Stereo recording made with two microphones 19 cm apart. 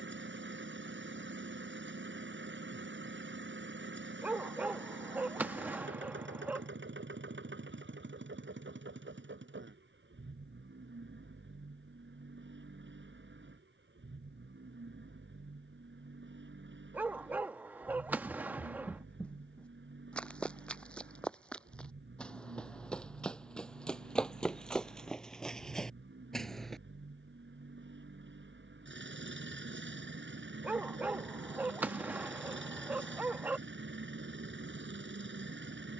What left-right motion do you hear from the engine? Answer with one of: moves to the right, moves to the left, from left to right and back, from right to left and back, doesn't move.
doesn't move.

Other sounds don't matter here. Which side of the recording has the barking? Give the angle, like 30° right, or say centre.
10° right.